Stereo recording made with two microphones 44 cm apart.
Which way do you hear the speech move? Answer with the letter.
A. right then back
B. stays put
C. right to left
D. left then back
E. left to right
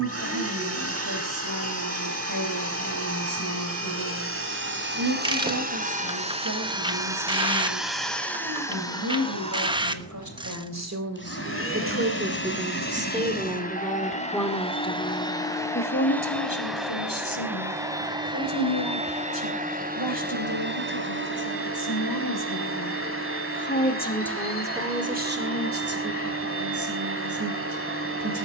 D.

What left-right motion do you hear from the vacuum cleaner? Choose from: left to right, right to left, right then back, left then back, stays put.
left then back.